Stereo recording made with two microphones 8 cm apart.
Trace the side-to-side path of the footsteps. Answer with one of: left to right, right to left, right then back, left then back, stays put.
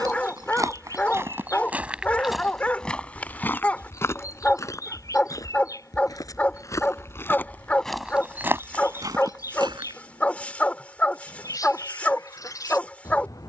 left then back.